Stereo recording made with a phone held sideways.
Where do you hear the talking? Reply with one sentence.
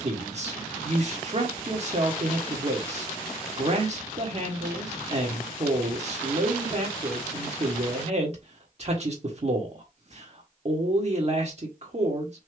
You can hear the talking on the right.